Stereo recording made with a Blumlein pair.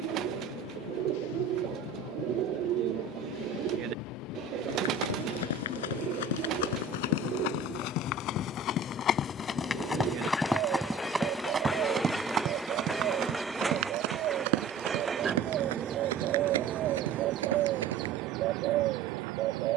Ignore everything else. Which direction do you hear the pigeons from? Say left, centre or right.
right.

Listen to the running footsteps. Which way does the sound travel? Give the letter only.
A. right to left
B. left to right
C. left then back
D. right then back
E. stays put
B.